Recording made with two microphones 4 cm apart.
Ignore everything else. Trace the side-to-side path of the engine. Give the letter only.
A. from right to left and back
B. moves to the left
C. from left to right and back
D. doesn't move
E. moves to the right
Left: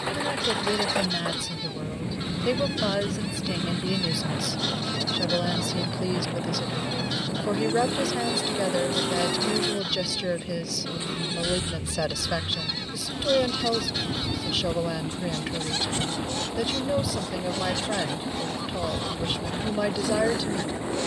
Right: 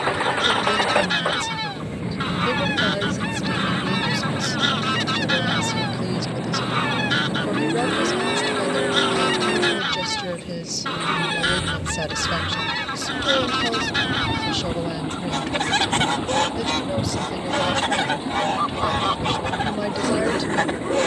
D.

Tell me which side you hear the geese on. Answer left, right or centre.
right.